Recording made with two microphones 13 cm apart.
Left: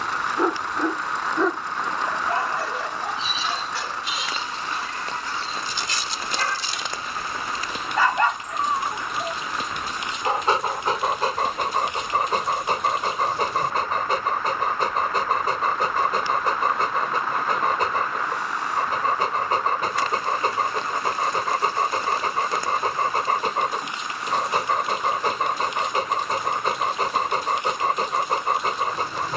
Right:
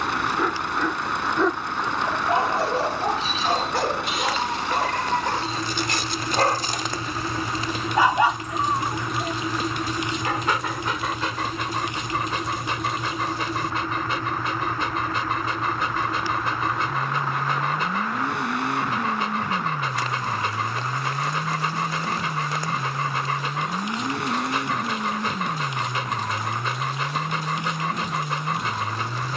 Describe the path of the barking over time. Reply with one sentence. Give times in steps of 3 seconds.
In this clip you hear the barking in the centre from 0 s, on the right from 3 s and on the left from 9 s.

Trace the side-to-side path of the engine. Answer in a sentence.
You can hear the engine stay put.